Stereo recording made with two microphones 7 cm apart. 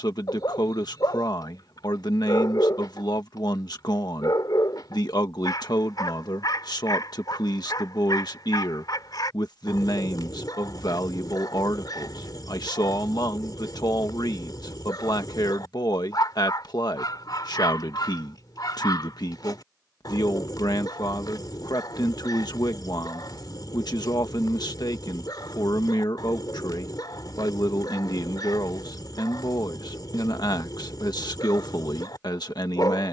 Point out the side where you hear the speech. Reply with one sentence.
In this clip you hear the speech on the left.